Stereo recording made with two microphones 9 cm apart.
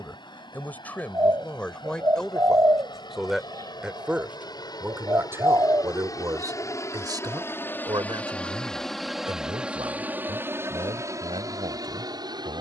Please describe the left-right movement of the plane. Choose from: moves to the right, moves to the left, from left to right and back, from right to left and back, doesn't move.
moves to the right.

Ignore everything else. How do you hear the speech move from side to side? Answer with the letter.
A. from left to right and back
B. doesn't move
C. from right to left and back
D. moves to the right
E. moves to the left
D.